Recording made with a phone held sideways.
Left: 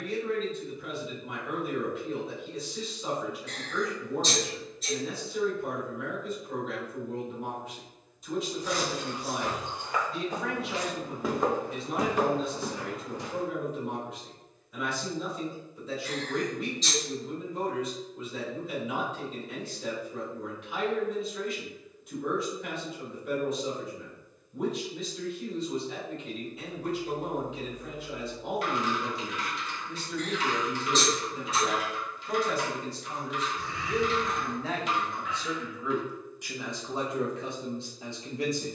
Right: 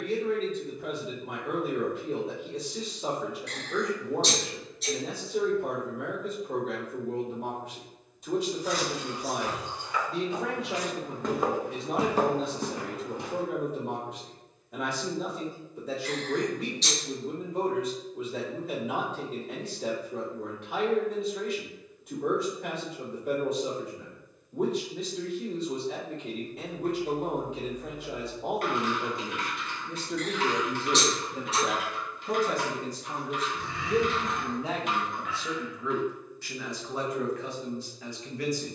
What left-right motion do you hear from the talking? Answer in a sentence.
In this clip you hear the talking travel towards the left.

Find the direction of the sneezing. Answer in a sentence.
In this clip you hear the sneezing on the right.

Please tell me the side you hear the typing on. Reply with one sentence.
You can hear the typing on the right.